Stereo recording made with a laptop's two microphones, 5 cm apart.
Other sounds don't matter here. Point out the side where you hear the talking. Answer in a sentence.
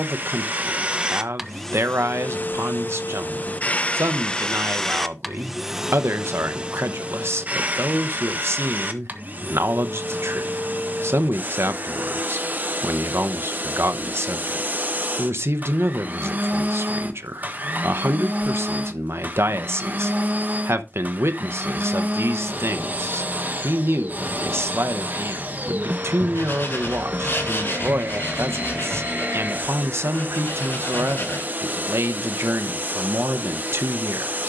You can hear the talking on the right.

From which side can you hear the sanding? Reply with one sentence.
In this clip you hear the sanding on the left.